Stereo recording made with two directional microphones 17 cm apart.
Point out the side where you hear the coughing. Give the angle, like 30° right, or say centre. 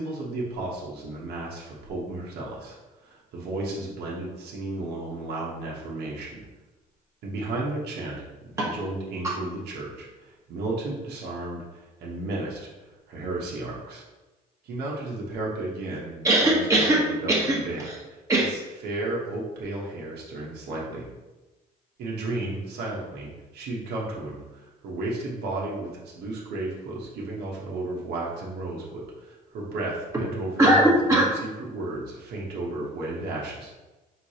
20° right.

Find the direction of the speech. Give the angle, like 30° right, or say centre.
70° right.